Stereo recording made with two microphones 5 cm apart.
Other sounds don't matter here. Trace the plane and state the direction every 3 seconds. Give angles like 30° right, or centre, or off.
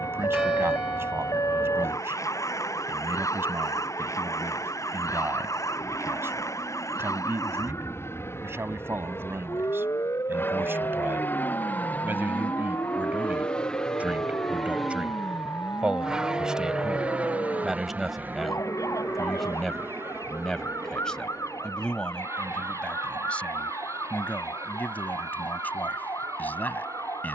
70° left, 70° left, 60° left, 40° left, 20° left, 20° right, 40° right, 60° right, 60° right.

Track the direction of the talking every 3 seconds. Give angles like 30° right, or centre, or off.
50° right, 50° right, 50° right, 50° right, 30° right, 10° right, centre, 20° left, 30° left.